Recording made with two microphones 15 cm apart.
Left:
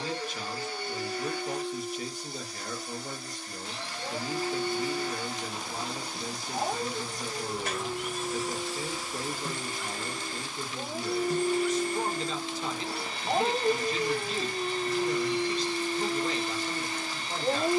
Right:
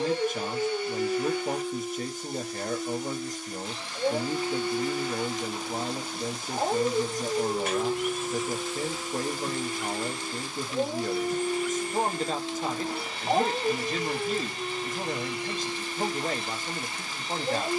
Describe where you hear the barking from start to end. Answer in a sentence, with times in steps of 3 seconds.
In this clip you hear the barking on the right from 0 s, in the centre from 12 s and on the left from 15 s.